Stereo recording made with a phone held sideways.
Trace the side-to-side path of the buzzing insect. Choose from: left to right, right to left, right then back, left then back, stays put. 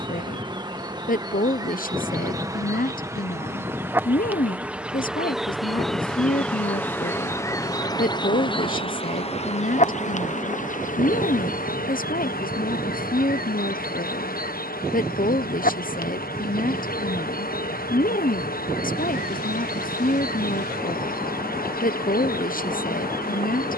right to left.